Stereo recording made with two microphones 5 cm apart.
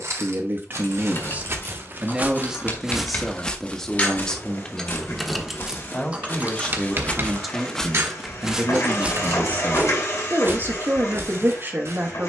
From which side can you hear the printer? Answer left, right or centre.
left.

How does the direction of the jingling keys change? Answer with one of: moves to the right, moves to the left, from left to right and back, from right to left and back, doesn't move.
moves to the right.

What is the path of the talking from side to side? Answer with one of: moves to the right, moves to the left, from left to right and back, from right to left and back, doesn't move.
from right to left and back.